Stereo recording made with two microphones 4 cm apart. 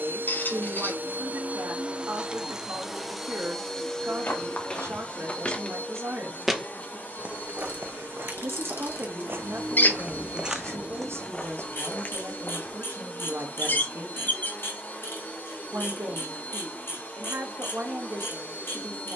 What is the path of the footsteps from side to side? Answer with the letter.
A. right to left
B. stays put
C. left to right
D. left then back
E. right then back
E.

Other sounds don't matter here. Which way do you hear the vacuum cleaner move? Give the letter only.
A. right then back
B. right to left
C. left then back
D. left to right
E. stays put
B.